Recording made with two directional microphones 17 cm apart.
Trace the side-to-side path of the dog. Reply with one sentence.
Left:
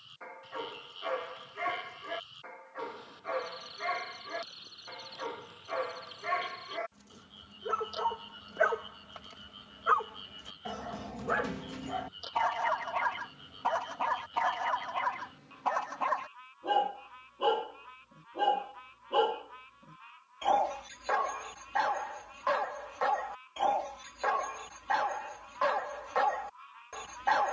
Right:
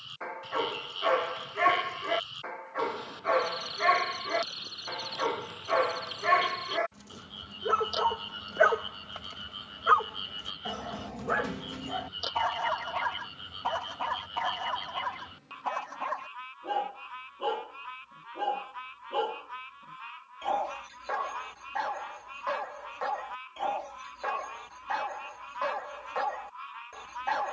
You can hear the dog go from the right side to the left.